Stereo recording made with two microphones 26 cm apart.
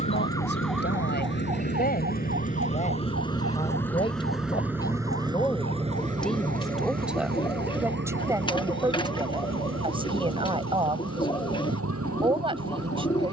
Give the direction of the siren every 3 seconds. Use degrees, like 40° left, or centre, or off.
20° right, 60° right, 70° right, 70° right, 80° right.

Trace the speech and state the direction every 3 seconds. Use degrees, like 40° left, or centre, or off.
40° left, 20° left, 10° right, 20° right, 20° right.